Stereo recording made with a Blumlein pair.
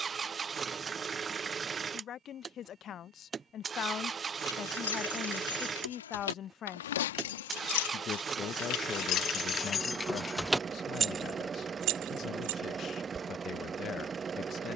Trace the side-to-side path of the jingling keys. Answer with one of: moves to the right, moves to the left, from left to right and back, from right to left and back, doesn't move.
moves to the right.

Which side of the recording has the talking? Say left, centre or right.
left.